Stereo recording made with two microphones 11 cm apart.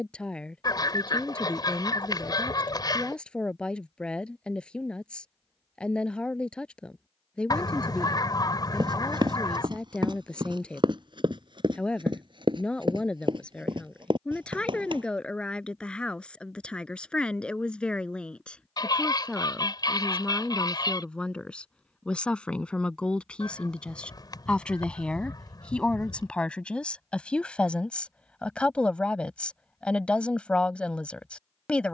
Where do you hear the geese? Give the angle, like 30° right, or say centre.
30° left.